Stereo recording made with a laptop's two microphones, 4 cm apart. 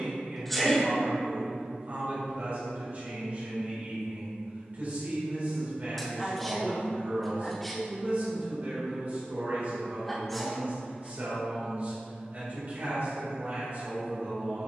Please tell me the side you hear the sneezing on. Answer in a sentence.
You can hear the sneezing in the centre.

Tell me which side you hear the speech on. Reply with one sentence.
In this clip you hear the speech on the right.